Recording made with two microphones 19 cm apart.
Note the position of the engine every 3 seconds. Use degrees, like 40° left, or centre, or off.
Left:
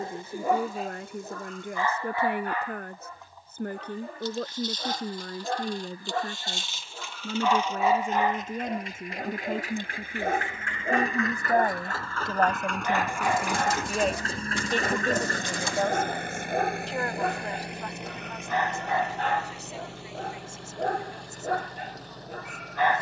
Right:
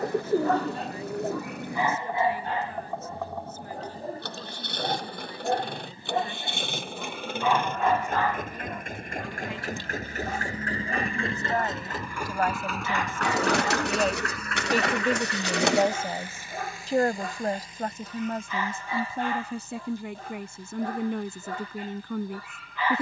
70° right, 70° right, 60° right, 40° right, 10° left, 60° left, 80° left, 80° left.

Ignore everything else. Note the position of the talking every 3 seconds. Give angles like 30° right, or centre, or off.
60° left, 60° left, 50° left, 40° left, 10° left, 30° right, 60° right, 70° right.